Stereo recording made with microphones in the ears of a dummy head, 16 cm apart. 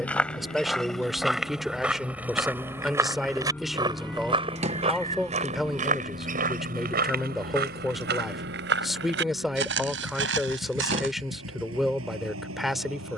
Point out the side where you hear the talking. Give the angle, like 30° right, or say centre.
centre.